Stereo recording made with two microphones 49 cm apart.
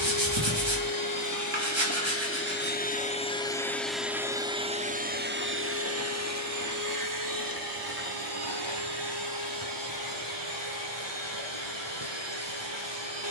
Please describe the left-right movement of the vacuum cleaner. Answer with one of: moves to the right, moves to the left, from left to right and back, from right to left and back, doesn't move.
moves to the right.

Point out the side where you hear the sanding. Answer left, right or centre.
right.